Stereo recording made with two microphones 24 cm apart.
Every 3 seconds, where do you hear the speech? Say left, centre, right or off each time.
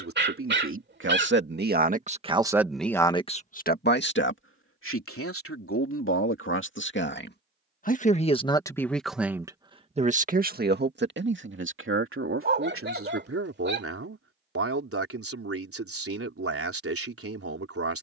right, left, left, right, right, right.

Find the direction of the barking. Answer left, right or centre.
right.